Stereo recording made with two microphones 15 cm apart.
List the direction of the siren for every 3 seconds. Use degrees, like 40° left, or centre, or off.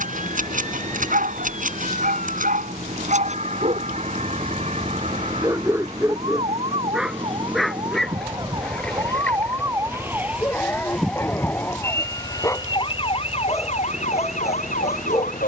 60° right, 50° right, 40° right, 10° right, 40° left.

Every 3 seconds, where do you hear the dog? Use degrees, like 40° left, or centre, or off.
70° right, 30° right, centre, 10° left, 20° left.